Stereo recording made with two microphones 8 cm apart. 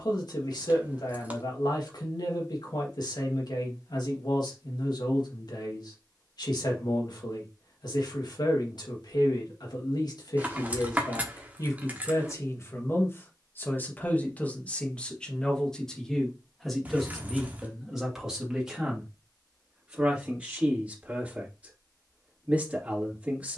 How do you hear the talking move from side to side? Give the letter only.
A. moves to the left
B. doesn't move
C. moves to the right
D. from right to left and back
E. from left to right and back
C.